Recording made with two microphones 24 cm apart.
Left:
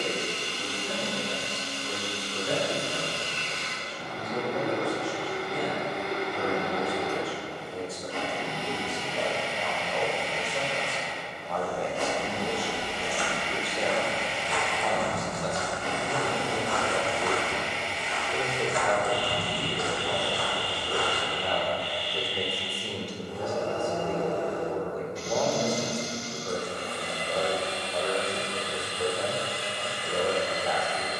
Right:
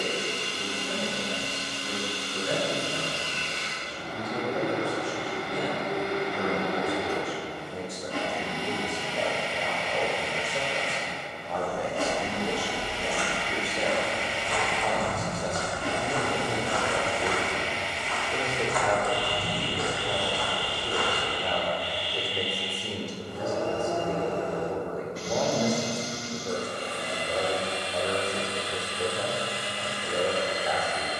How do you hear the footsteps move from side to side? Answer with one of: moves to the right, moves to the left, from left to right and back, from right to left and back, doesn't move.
moves to the left.